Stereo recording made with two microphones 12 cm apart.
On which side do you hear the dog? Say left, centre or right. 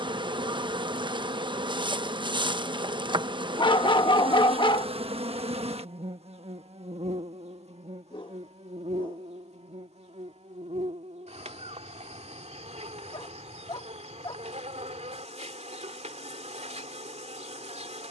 left.